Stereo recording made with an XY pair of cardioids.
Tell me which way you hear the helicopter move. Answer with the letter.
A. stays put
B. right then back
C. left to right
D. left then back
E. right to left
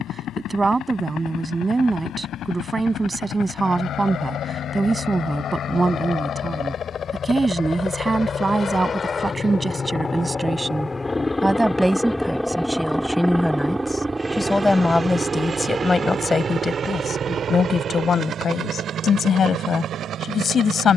C.